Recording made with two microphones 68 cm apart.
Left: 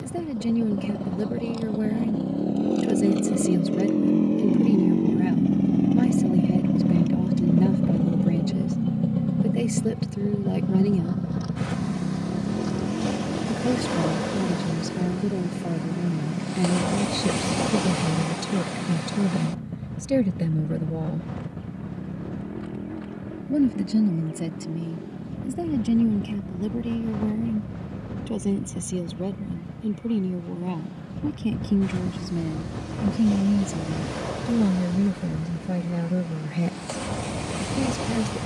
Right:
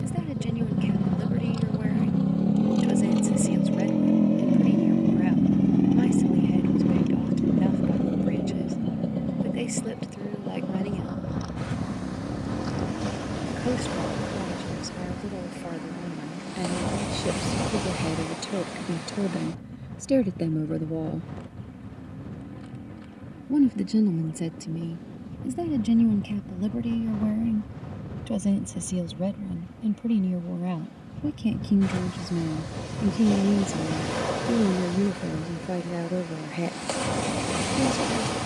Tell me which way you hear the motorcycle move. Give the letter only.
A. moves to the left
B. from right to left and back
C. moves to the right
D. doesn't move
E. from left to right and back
A.